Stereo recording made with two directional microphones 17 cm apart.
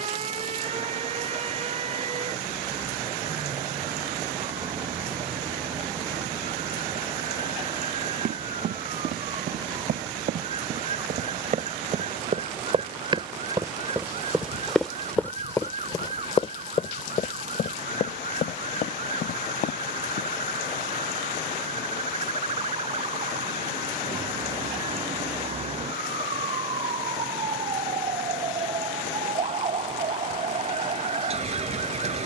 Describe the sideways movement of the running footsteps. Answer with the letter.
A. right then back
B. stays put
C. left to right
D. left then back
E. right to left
E.